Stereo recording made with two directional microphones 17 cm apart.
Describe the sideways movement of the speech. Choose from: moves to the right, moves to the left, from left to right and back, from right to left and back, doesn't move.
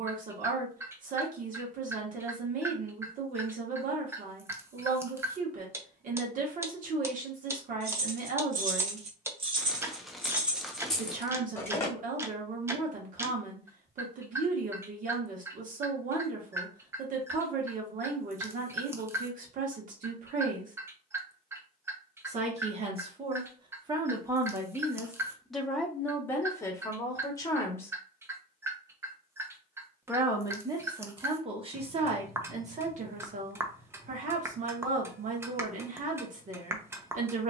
from right to left and back.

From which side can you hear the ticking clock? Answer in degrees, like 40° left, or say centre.
10° right.